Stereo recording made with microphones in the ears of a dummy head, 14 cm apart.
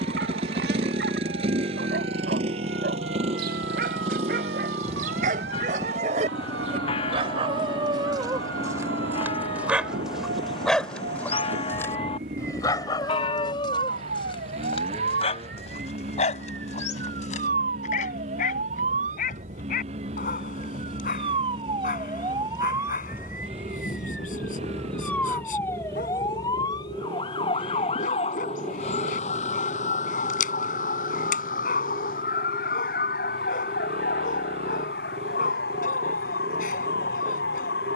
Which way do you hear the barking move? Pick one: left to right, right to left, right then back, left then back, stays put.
right to left.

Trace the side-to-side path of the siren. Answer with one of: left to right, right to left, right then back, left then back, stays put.
right to left.